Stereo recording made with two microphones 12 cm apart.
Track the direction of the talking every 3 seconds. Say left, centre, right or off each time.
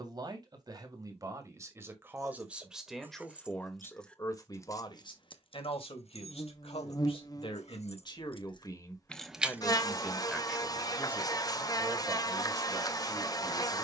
right, left, left, centre, right.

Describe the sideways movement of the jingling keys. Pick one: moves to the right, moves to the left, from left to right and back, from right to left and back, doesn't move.
from right to left and back.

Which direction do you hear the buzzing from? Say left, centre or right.
left.